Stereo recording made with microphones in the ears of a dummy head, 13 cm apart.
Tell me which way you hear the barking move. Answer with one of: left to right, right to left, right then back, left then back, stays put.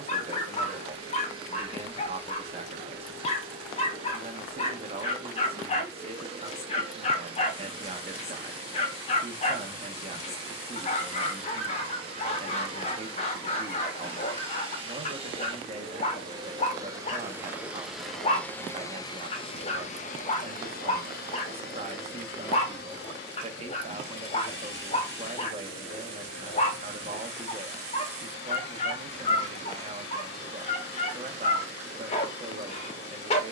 stays put.